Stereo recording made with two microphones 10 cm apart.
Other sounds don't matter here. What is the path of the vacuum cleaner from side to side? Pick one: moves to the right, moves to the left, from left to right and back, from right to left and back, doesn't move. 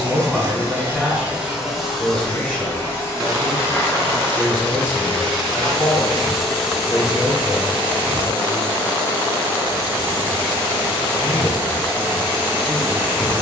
from right to left and back.